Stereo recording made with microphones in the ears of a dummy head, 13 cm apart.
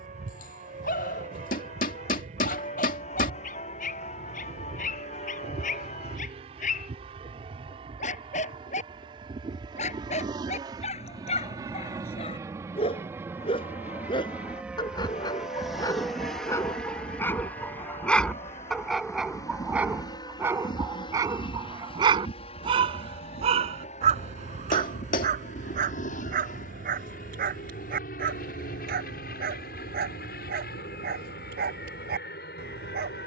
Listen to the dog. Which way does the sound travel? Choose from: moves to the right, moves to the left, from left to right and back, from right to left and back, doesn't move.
moves to the right.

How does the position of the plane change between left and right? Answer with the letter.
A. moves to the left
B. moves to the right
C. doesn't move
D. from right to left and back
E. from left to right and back
A.